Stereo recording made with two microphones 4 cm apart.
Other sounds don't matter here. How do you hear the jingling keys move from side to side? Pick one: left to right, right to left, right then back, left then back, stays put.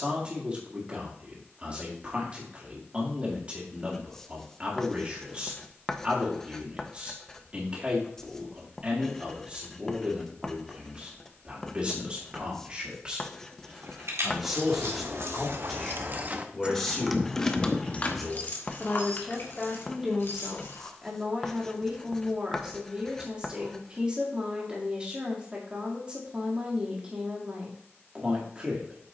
right to left.